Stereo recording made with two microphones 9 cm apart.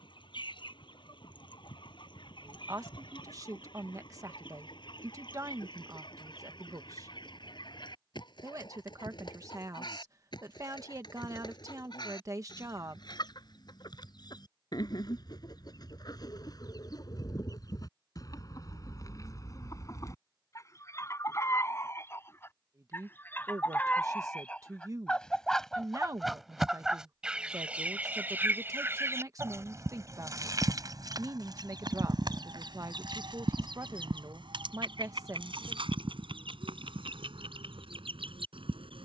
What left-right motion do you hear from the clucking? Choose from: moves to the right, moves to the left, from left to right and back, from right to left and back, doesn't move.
moves to the right.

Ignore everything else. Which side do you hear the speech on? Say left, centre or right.
right.